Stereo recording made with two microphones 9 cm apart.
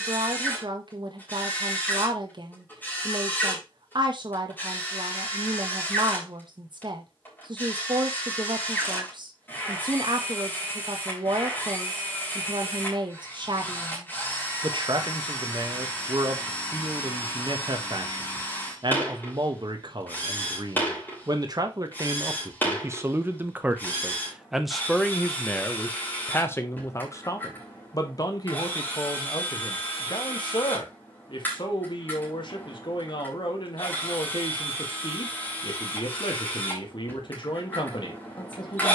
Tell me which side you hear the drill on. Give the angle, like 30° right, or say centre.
20° left.